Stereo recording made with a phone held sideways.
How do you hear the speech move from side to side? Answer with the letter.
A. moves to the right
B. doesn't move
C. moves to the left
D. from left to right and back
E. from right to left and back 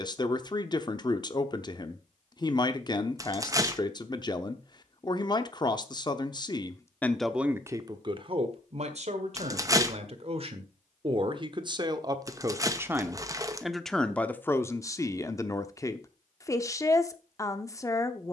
D.